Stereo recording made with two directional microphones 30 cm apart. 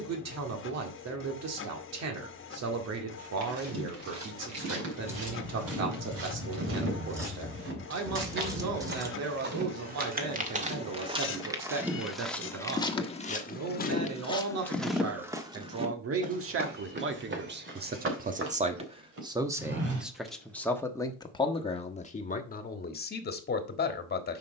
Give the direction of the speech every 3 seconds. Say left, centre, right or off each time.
right, right, right, right, right, right, centre, left.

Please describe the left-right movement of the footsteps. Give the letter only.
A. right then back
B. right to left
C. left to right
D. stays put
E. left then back
E.